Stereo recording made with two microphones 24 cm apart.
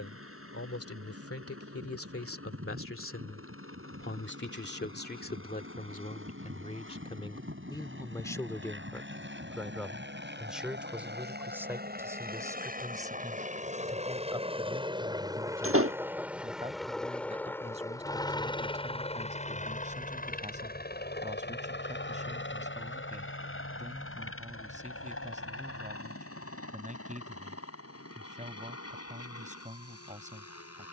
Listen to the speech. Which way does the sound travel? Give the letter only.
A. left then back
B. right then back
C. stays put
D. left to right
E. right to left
D.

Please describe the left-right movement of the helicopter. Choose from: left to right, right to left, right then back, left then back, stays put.
right to left.